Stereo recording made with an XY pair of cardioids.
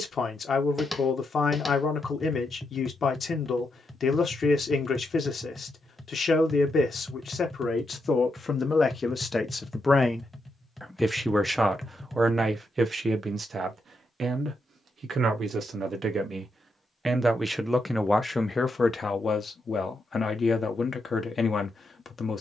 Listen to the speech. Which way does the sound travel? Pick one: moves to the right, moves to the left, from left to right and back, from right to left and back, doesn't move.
from left to right and back.